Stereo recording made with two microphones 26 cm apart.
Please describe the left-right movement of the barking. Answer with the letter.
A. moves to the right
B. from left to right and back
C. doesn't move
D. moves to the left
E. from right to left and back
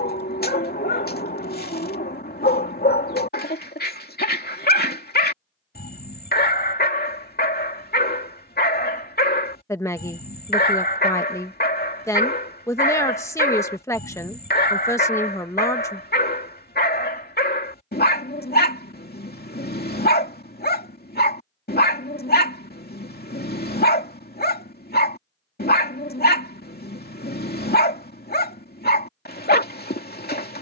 C.